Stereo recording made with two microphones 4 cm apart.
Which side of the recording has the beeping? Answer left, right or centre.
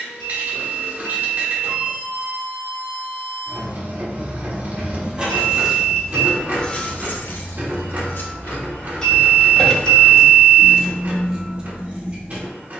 centre.